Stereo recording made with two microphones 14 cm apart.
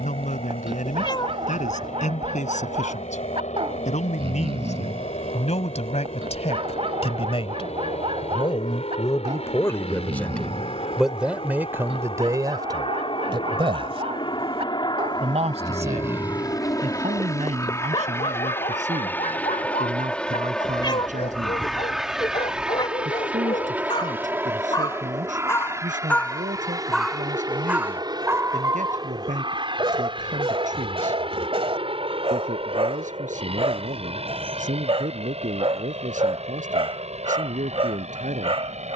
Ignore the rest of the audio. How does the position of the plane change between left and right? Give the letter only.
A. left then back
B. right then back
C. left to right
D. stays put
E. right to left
C.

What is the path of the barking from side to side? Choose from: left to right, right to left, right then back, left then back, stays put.
left then back.